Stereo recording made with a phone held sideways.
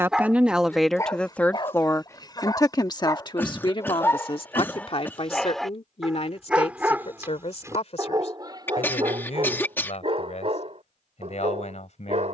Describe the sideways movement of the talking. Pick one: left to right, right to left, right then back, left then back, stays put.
right to left.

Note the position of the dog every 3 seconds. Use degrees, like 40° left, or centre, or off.
20° left, 10° left, 20° right, 40° right.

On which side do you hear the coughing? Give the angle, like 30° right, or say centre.
10° left.